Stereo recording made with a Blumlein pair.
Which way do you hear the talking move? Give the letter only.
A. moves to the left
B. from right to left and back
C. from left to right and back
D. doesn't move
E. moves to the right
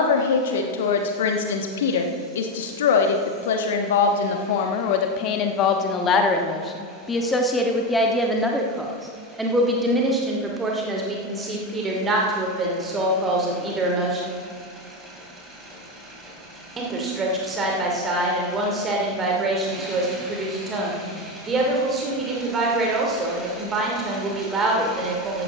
E.